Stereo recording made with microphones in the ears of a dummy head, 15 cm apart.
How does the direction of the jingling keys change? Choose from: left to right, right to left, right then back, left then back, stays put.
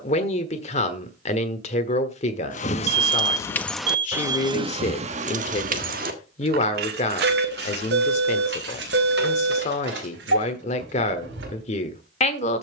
left to right.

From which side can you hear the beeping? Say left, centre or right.
right.